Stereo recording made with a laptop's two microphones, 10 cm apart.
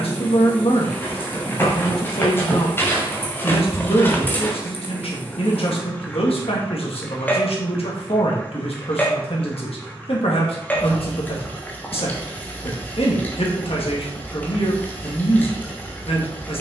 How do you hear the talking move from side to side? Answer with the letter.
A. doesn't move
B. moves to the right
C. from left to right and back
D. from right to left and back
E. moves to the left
A.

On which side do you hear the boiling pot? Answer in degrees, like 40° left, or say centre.
20° left.